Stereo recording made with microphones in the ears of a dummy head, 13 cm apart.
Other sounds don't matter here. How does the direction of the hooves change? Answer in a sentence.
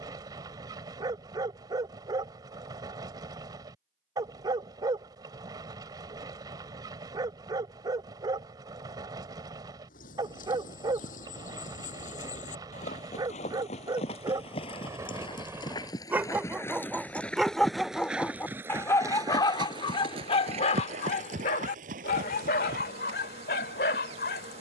In this clip you hear the hooves go from the left side to the right.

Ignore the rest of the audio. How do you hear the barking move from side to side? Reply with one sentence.
In this clip you hear the barking travel towards the left.